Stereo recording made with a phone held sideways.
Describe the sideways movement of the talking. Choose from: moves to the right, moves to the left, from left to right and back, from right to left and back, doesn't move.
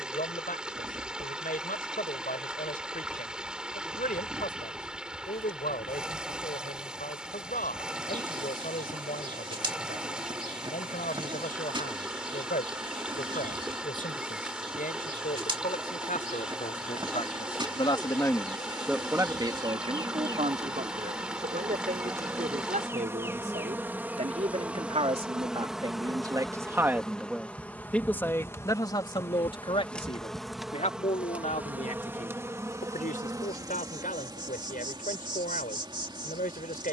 from left to right and back.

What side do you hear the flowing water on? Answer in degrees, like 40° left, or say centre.
10° right.